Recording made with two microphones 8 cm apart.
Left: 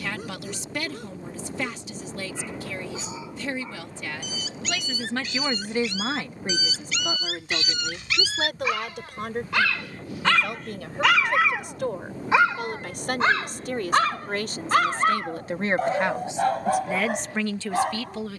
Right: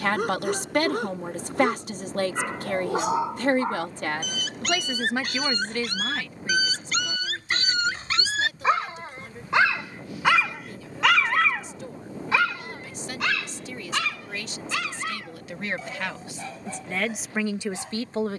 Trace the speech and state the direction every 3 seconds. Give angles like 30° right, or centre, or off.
60° right, 30° right, 50° left, 70° left, 60° left, 20° left.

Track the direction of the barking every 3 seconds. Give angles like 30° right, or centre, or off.
70° right, 60° right, 40° right, 10° right, 40° left, 60° left.